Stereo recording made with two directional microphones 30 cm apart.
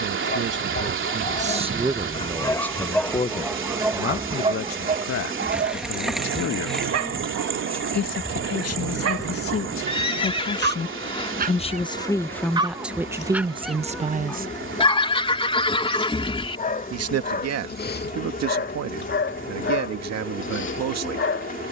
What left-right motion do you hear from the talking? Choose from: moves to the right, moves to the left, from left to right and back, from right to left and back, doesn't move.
from right to left and back.